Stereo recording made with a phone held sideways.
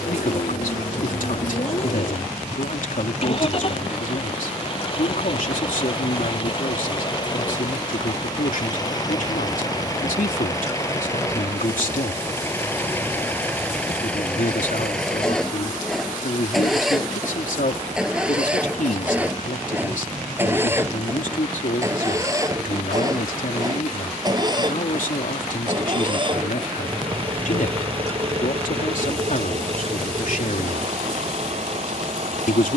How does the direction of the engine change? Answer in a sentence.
You can hear the engine move to the right.